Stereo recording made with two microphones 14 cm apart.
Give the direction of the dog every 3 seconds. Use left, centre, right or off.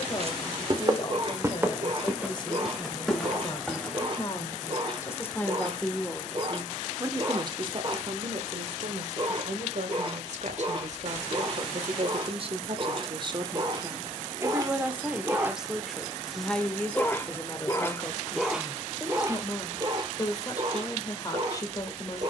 right, right, right, right, right, centre, right, right.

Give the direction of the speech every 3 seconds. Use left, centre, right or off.
left, left, right, right, right, centre, left, left.